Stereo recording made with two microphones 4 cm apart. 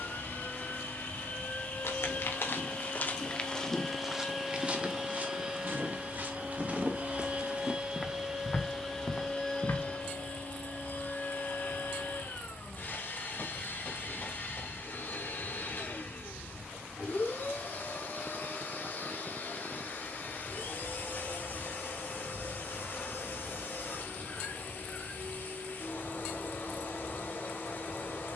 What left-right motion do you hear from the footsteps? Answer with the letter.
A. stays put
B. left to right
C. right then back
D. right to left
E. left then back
C.